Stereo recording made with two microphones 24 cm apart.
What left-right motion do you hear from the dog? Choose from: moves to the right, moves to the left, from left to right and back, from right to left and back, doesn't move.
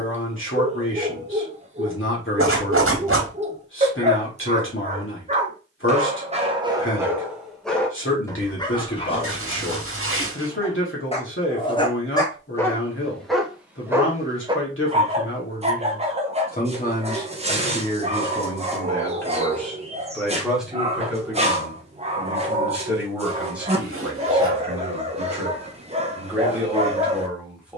from right to left and back.